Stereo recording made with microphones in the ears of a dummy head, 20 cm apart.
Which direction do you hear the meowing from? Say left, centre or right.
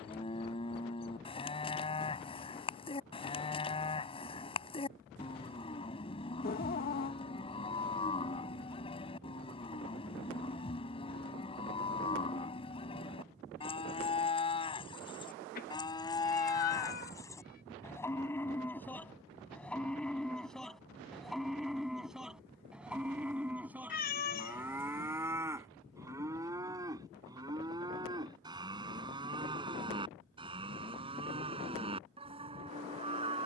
left.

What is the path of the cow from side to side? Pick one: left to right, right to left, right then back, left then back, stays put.
left to right.